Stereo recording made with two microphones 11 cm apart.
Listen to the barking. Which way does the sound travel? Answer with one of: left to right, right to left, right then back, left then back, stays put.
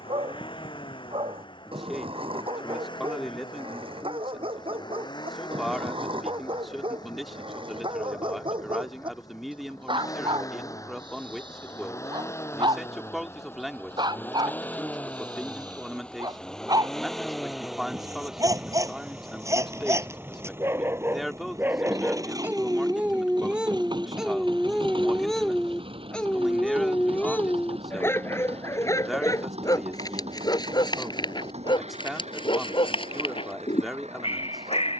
right to left.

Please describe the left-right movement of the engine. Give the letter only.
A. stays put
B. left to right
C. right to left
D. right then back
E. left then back
B.